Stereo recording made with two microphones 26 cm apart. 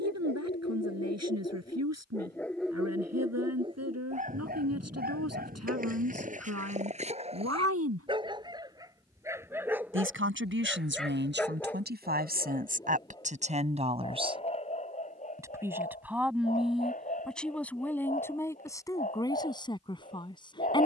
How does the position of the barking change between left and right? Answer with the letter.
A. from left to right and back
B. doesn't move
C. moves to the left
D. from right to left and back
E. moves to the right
A.